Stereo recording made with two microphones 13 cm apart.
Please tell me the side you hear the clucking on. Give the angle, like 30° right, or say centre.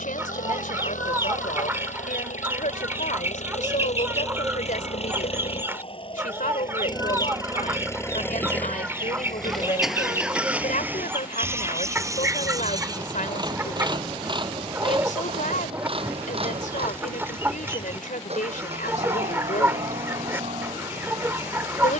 20° right.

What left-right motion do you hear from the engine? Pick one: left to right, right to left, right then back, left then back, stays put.
left to right.